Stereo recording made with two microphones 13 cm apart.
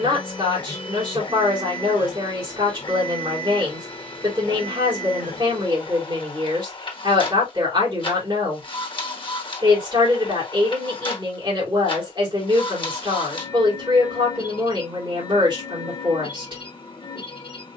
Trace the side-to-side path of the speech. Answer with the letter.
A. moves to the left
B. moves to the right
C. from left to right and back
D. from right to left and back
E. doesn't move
E.